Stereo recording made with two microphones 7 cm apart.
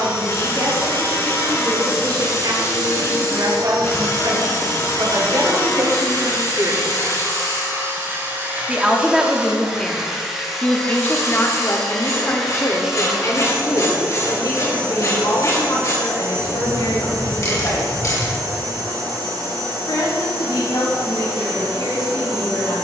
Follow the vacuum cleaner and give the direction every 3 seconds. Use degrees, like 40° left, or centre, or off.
80° right, 70° right, 40° right, centre, 10° right, 50° right, 70° right, 70° right.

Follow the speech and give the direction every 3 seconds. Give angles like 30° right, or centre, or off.
70° right, 60° right, 40° right, 20° left, 50° left, 70° left, 70° left, 80° left.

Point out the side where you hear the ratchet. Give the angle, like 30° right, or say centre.
50° left.